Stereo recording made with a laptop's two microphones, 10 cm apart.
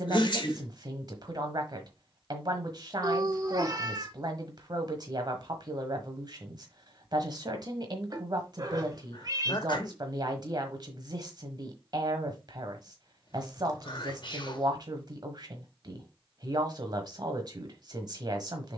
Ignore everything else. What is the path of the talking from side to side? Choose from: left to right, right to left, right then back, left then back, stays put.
stays put.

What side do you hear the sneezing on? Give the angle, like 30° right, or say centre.
50° left.